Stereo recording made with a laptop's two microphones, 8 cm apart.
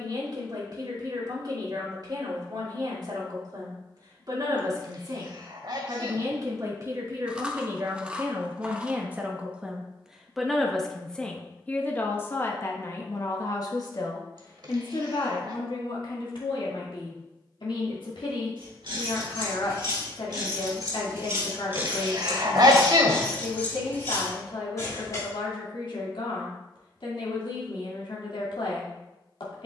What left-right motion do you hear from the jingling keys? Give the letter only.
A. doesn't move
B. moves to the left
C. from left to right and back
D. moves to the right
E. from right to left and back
B.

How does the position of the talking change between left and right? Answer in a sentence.
In this clip you hear the talking move to the left.